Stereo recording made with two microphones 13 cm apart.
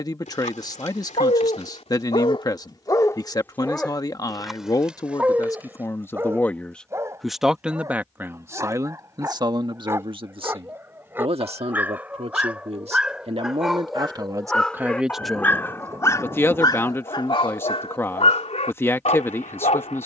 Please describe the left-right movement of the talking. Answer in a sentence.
In this clip you hear the talking go right and come back.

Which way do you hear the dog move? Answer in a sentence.
In this clip you hear the dog go right and come back.